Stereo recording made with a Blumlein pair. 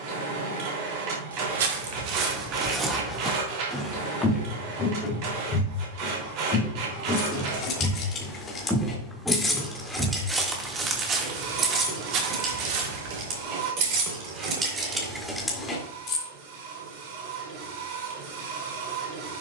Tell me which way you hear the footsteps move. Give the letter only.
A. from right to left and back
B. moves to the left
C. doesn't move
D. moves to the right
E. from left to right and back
A.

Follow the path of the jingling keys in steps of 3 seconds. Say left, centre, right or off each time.
off, off, left, centre, right, centre, off.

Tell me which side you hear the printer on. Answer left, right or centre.
right.